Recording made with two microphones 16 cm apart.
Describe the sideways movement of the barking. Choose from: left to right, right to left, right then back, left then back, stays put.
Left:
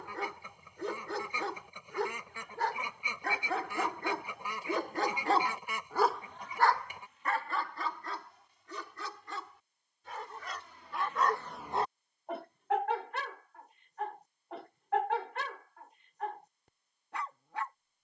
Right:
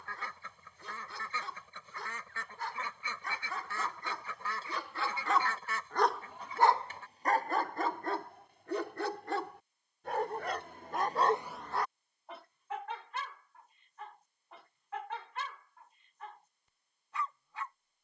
right then back.